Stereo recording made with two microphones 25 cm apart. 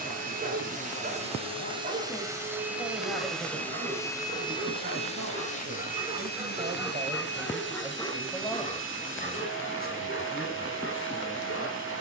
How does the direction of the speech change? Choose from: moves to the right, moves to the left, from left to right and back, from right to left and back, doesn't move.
from left to right and back.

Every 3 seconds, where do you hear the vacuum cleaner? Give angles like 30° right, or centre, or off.
20° right, 20° left, 40° left, 50° left.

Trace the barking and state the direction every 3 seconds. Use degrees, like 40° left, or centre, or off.
40° right, 30° right, centre, 50° left.